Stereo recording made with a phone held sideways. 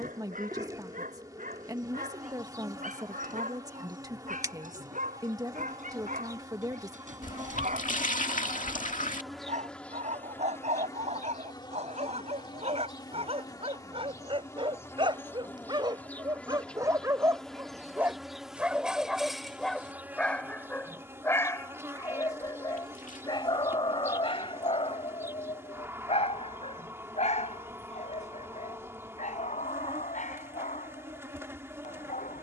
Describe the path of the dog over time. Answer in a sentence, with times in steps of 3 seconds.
In this clip you hear the dog on the right from 0 s, in the centre from 18 s and on the left from 21 s.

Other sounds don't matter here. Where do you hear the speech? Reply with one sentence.
In this clip you hear the speech on the right.